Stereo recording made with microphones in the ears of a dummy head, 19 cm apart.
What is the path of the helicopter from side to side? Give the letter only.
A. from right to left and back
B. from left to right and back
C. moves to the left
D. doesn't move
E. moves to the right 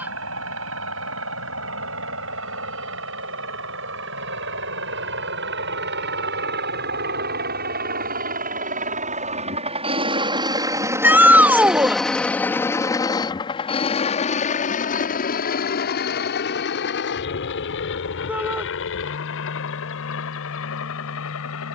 C.